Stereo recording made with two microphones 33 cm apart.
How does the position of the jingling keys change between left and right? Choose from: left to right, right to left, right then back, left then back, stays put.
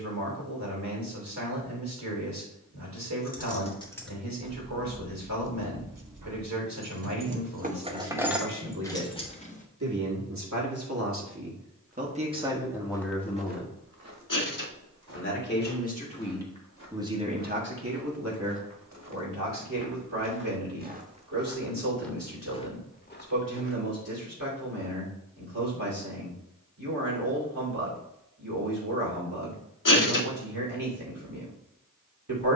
right then back.